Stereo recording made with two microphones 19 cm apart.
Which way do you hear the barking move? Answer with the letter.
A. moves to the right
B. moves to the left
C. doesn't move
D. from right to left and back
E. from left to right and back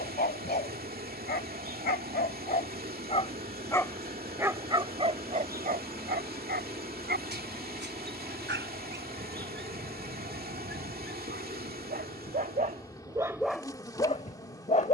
E.